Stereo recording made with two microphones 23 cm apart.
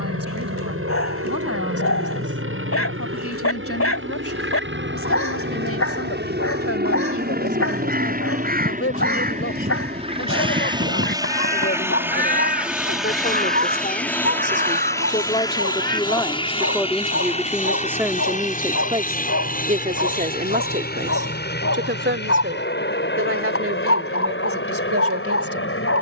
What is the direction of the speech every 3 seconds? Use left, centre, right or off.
left, left, left, left, left, centre, right, right, right.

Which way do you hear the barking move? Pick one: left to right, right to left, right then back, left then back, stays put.
stays put.